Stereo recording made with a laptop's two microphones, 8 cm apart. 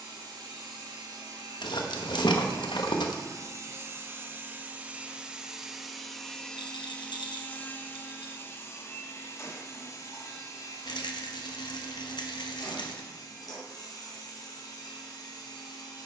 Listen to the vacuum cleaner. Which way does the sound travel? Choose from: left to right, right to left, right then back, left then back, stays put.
right to left.